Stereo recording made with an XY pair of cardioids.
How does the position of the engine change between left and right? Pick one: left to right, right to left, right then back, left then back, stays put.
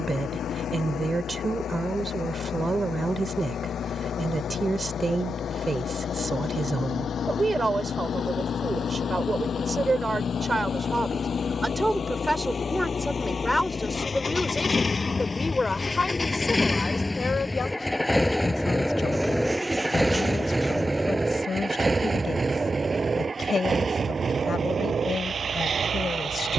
left to right.